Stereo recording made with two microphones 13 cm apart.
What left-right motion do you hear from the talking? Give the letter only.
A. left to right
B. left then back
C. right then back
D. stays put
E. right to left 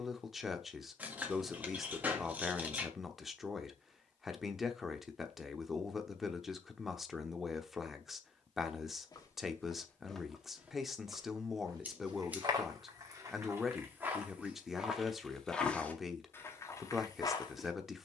D.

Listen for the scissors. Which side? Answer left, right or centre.
centre.